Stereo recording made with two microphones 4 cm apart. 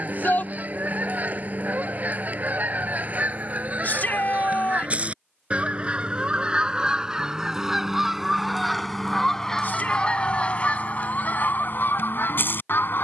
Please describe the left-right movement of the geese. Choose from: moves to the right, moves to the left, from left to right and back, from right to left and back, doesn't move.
moves to the left.